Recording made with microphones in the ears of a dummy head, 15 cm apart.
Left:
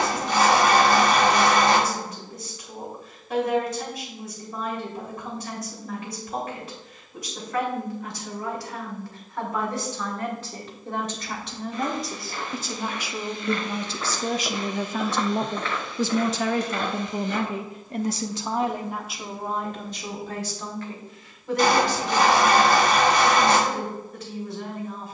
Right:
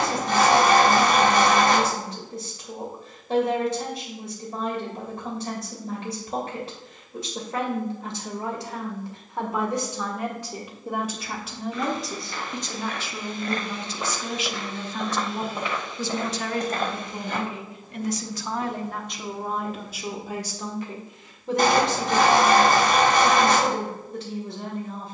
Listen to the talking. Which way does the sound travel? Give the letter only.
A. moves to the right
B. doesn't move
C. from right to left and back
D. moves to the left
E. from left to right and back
C.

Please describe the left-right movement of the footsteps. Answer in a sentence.
In this clip you hear the footsteps move from right to left and back again.